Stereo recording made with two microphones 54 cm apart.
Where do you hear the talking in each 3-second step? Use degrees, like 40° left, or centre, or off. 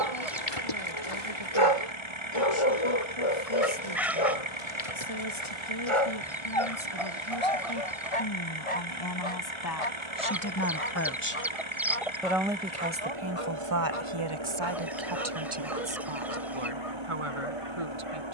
70° left, 60° left, 50° left, 30° left, 30° right, 70° right.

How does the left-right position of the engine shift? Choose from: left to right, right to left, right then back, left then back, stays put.
stays put.